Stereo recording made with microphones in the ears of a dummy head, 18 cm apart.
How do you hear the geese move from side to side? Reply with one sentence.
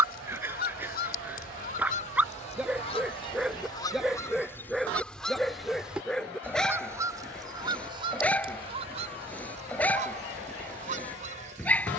In this clip you hear the geese move to the right.